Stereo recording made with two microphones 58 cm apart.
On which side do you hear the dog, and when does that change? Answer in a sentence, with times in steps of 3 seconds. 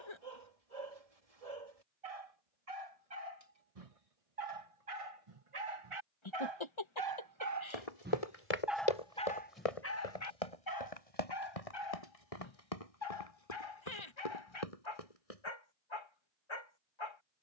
In this clip you hear the dog on the right from 0 s and on the left from 9 s.